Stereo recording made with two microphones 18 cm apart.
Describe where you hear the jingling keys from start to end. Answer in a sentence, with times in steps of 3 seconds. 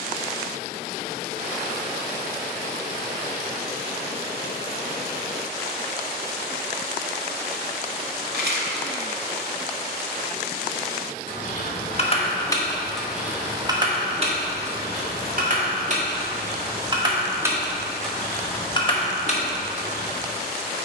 In this clip you hear the jingling keys not at all from 0 s, on the left from 9 s, in the centre from 12 s, on the right from 15 s and on the left from 18 s.